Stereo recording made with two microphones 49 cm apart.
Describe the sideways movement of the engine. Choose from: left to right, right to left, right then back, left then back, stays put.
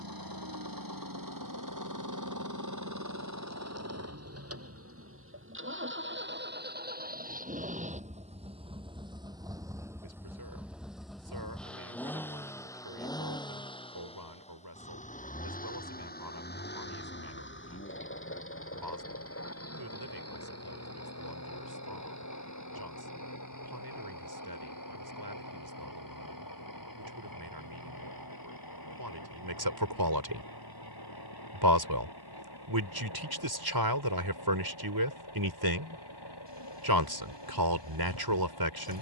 right to left.